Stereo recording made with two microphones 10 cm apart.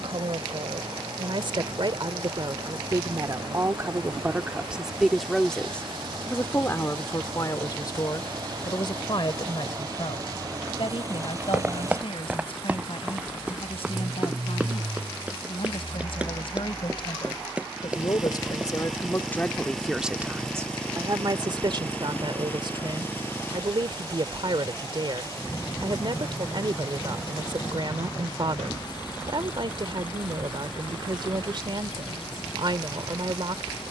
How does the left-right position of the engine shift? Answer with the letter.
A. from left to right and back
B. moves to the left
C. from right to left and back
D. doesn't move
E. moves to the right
B.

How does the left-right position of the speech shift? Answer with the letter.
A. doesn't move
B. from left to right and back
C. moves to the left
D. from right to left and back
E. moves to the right
D.